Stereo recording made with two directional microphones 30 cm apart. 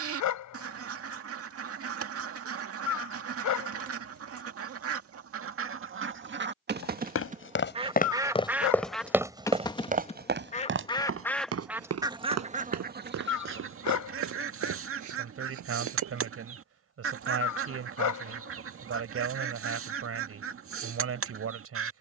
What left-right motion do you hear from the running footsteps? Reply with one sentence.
You can hear the running footsteps move from left to right.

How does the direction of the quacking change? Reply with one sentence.
In this clip you hear the quacking go left and come back.